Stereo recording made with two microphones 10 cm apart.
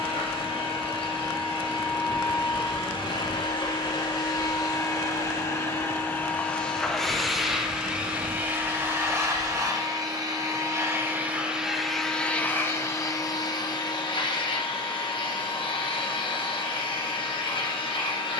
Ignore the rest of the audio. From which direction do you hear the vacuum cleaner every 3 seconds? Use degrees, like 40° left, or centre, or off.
60° left, 40° left, centre, 20° right, 40° left, 60° left.